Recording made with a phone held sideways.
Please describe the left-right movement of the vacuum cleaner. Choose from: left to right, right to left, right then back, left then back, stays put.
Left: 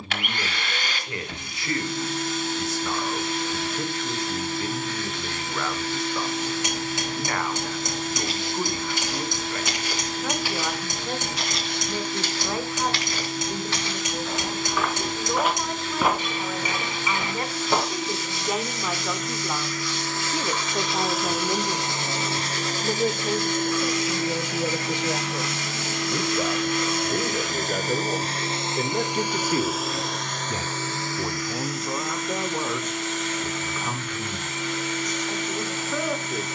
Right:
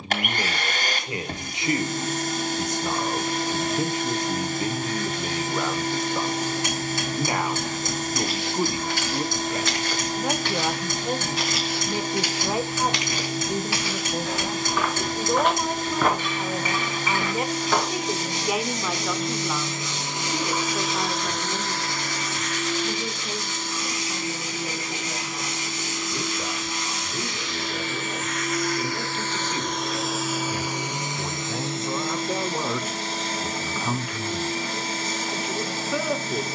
left then back.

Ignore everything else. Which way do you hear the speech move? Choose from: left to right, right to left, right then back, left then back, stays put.
left then back.